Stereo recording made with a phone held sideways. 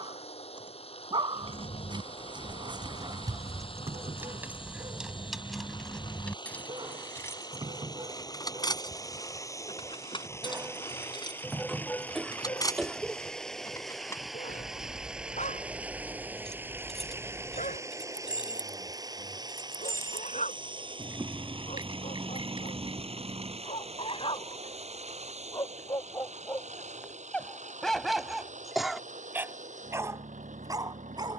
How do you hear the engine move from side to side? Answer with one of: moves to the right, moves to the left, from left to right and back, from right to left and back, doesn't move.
moves to the right.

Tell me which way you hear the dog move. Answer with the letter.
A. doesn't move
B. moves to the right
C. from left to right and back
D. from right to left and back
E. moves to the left
D.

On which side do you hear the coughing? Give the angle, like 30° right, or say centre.
centre.